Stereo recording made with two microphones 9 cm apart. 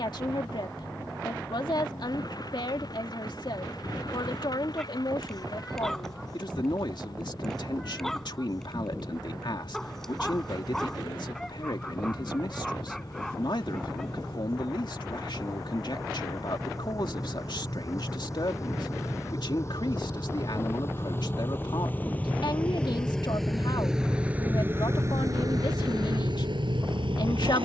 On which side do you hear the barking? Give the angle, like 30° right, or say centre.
centre.